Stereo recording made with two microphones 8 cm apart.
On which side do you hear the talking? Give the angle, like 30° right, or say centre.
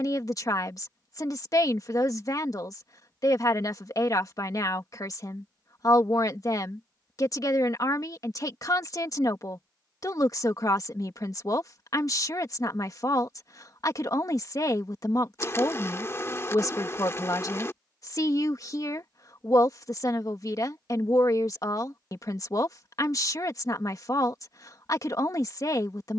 50° left.